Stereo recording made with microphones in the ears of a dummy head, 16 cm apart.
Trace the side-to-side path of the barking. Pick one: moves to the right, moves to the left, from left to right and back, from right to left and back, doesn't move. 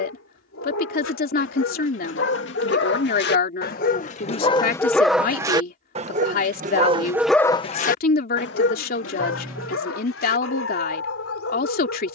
from left to right and back.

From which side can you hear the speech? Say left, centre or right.
left.